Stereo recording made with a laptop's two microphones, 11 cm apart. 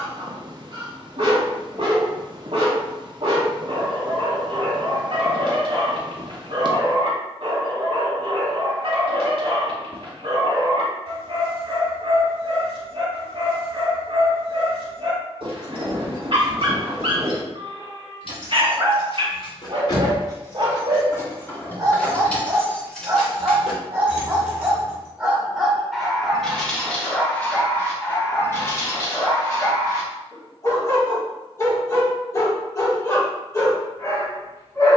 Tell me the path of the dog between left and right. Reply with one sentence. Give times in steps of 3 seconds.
You can hear the dog on the right from 0 s, in the centre from 24 s and on the left from 27 s.